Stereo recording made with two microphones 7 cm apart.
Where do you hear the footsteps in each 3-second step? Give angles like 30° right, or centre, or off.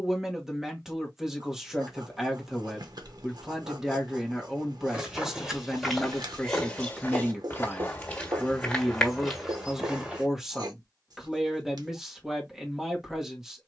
off, 10° right, 20° left, centre, off.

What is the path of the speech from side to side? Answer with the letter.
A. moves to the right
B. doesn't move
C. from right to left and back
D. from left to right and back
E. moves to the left
B.